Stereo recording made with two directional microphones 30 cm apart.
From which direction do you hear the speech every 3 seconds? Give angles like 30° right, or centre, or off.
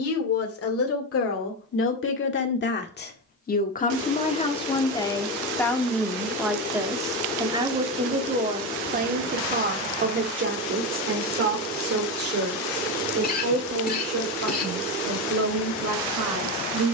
50° left, 20° left, 10° right, 40° right, 50° right, 60° right.